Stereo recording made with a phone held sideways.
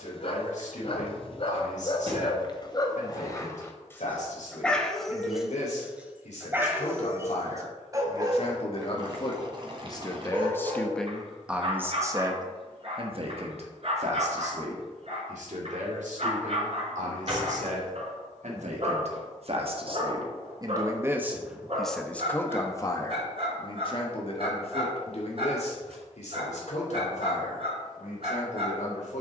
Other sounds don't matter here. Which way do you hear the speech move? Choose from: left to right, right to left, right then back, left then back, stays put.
right then back.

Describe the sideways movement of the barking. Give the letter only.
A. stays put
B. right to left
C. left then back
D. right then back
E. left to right
E.